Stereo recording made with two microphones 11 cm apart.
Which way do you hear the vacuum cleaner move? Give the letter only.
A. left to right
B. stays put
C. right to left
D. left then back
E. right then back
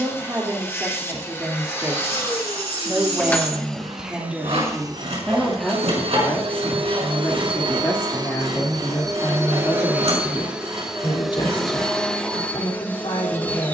E.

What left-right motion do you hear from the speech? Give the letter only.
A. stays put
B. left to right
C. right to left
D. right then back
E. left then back
C.